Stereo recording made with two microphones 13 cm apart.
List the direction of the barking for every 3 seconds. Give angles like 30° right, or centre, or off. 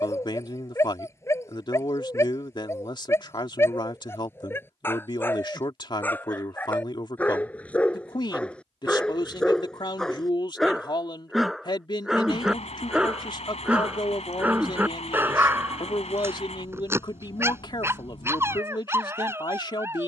20° left, 20° left, 10° left, centre, 10° right, 20° right, 20° right.